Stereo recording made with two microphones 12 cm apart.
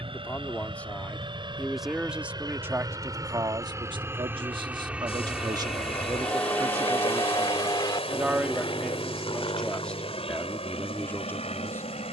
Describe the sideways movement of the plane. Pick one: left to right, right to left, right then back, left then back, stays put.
right to left.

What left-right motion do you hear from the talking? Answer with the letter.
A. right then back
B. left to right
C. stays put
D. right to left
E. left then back
A.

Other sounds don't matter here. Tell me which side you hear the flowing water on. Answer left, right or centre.
left.